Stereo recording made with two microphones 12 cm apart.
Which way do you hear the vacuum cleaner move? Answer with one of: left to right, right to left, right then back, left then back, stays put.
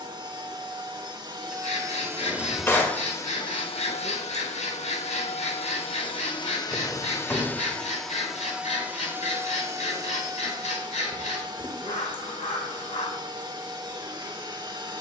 left then back.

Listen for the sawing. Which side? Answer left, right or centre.
left.